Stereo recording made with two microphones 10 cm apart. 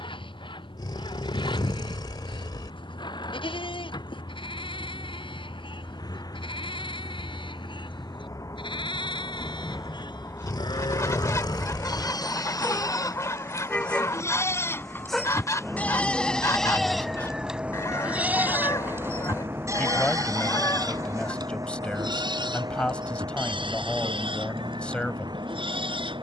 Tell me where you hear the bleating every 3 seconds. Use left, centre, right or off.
left, left, left, left, left, centre, right, right, right.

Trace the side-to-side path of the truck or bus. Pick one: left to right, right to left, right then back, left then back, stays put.
left to right.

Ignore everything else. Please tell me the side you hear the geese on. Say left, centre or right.
left.